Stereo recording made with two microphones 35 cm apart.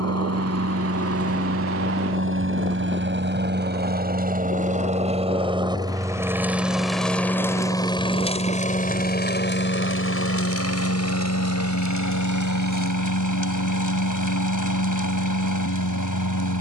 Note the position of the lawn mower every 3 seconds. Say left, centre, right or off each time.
right, right, centre, left, left, left.